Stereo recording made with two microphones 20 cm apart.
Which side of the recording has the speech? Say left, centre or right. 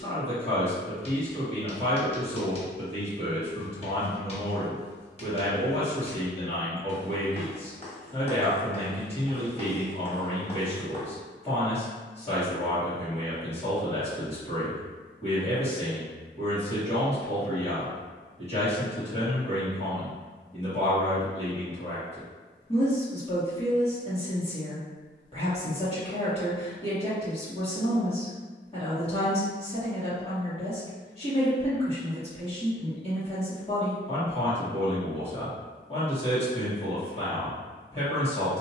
left.